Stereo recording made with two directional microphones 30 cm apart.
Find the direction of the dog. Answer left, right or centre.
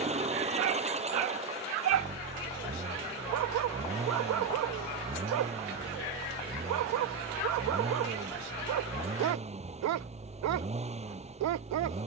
right.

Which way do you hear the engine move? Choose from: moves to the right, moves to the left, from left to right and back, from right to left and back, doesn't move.
doesn't move.